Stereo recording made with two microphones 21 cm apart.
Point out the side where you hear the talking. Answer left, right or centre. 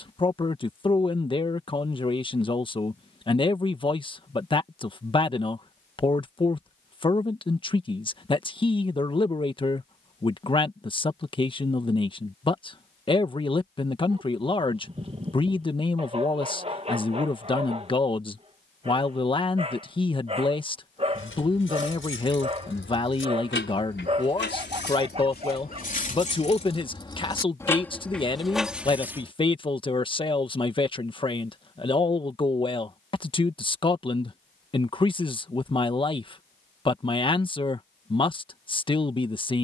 left.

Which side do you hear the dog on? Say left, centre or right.
right.